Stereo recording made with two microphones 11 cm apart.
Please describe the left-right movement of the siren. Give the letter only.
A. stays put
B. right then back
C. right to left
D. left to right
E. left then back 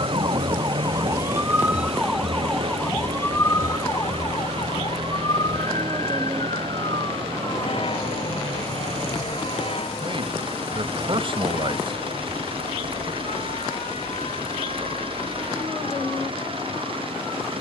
C.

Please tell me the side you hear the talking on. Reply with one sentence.
You can hear the talking on the right.